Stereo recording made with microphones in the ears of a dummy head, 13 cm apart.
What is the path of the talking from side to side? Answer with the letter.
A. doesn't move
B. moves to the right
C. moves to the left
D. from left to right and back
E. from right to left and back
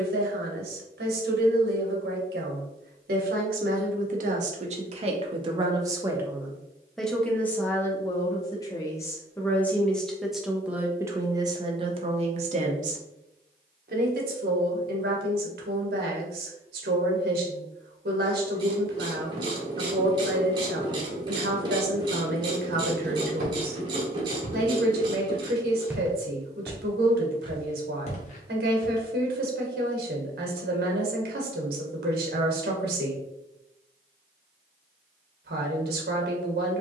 E.